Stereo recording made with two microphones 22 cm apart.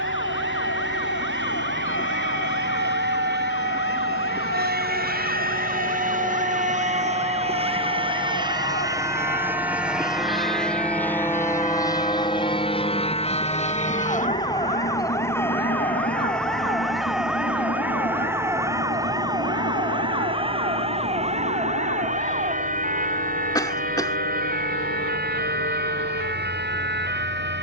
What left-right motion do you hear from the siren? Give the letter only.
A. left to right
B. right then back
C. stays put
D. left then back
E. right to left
A.